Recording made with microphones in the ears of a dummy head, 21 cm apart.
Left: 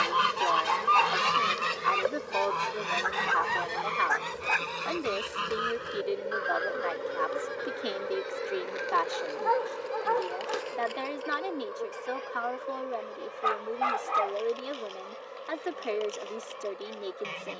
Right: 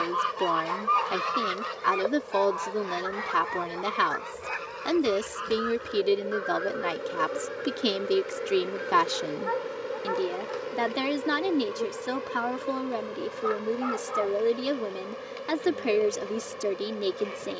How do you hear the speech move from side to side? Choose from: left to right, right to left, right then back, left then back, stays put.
stays put.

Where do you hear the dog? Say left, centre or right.
left.